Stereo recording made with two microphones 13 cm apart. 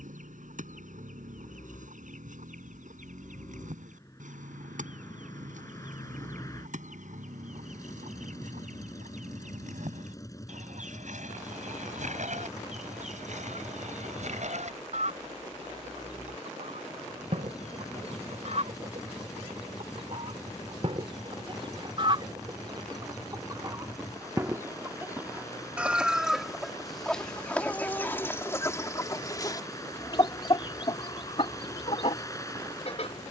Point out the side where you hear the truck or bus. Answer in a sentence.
You can hear the truck or bus on the left.